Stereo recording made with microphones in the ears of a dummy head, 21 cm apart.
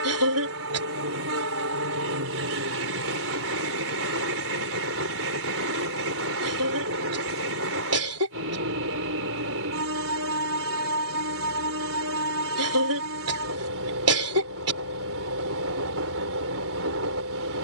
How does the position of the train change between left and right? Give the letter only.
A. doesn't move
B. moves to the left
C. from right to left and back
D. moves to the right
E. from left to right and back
A.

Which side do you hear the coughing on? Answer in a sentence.
You can hear the coughing on the right.